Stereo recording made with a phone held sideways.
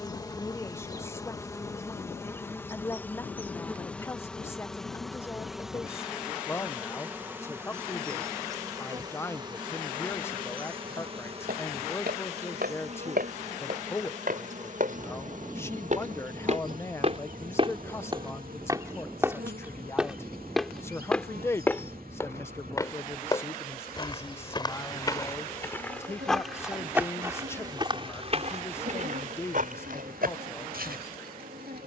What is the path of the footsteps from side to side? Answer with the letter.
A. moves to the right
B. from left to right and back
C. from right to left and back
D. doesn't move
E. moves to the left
C.